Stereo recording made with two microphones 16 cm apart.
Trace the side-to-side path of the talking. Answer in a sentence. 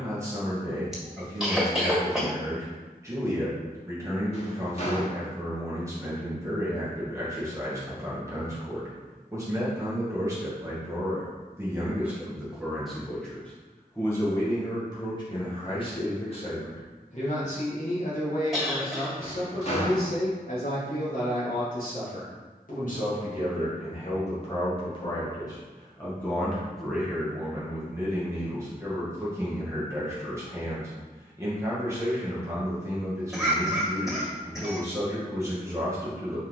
You can hear the talking go left and come back.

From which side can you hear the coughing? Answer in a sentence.
In this clip you hear the coughing in the centre.